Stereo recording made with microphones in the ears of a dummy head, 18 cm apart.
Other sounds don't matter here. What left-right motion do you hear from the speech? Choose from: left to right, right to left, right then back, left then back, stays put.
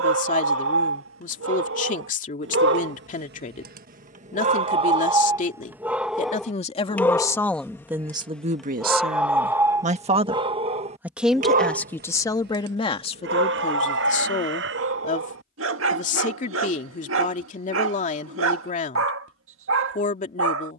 right then back.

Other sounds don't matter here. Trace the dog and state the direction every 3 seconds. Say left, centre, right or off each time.
right, right, centre, right, right, right, right.